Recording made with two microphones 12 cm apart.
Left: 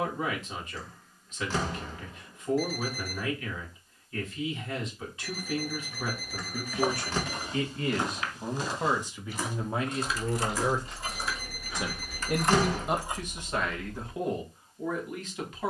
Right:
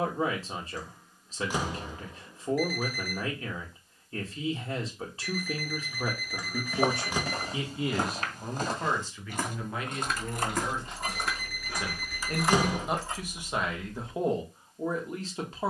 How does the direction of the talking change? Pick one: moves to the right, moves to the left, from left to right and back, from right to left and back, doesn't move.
from right to left and back.